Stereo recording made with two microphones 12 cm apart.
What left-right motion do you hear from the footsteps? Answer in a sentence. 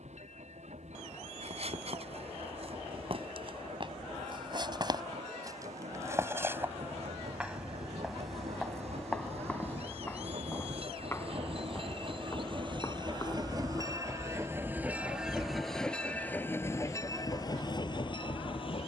You can hear the footsteps go from the right side to the left.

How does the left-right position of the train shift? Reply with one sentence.
You can hear the train move to the left.